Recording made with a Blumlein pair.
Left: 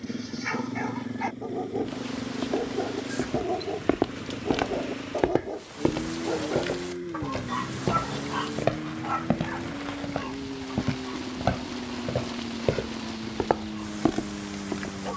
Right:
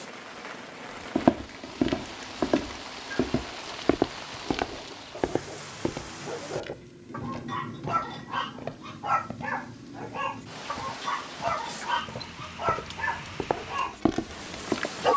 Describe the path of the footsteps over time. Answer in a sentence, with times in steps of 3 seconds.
You can hear the footsteps on the right from 0 s, in the centre from 3 s, on the left from 6 s and in the centre from 12 s.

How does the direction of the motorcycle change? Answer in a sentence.
In this clip you hear the motorcycle stay put.